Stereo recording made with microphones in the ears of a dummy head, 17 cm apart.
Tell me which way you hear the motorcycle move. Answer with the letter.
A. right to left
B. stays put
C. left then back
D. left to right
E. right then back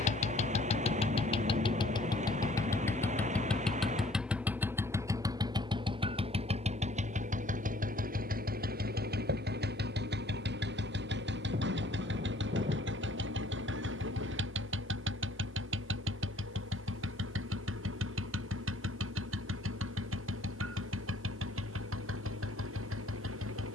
D.